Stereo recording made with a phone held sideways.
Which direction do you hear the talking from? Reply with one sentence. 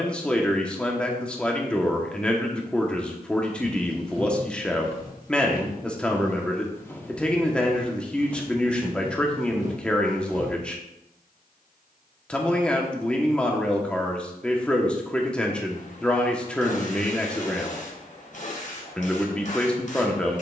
You can hear the talking in the centre.